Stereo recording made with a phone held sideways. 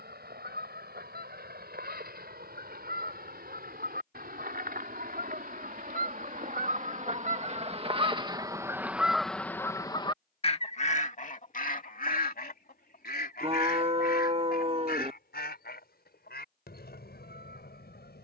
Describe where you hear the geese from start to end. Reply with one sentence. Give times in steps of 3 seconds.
You can hear the geese on the right from 0 s and on the left from 9 s.